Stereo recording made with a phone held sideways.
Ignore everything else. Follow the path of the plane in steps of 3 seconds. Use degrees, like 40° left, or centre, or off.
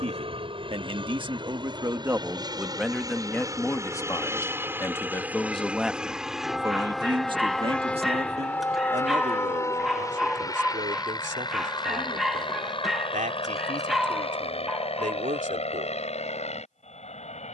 40° right, 20° right, 10° left, 30° left, 40° left, 50° left.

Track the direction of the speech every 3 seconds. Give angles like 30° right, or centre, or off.
30° right, 10° left, 40° right, 70° right, 70° right, 70° right.